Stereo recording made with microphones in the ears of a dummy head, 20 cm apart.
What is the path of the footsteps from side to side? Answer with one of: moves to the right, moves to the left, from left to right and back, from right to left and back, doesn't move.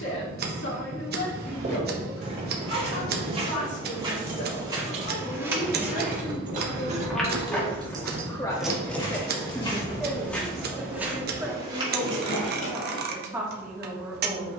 from right to left and back.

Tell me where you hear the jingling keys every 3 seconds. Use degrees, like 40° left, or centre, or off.
off, 50° right, 20° right, 50° left, 70° left.